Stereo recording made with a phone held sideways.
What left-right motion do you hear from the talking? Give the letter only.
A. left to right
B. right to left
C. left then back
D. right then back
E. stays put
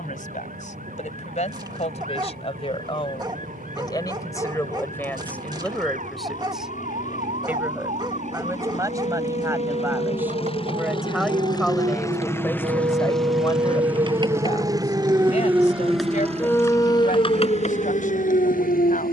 D.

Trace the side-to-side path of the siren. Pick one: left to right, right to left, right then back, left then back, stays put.
right to left.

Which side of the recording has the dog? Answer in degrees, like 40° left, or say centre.
30° right.